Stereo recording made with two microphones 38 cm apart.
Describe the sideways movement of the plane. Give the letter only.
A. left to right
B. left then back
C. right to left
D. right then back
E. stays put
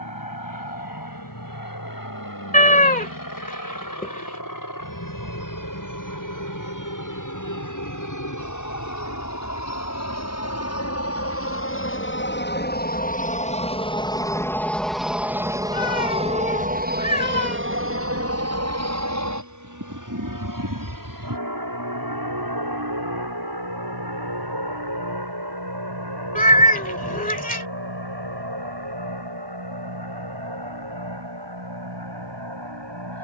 A.